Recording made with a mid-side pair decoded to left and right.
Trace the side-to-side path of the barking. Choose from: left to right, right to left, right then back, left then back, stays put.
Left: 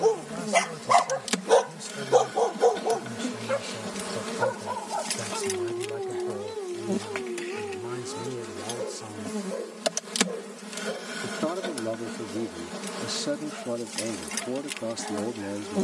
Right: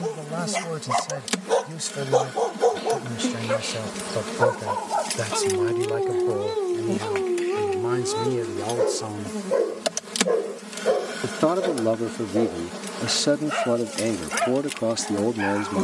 left to right.